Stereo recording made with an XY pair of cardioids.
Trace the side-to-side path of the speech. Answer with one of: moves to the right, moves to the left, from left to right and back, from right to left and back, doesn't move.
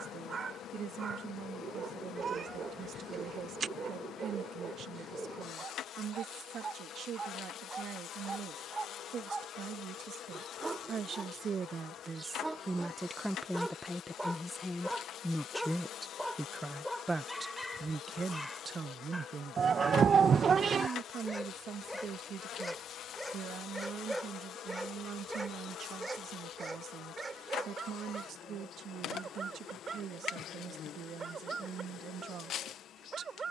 from right to left and back.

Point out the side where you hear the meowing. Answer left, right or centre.
right.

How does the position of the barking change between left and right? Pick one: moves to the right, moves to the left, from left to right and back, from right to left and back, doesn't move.
from right to left and back.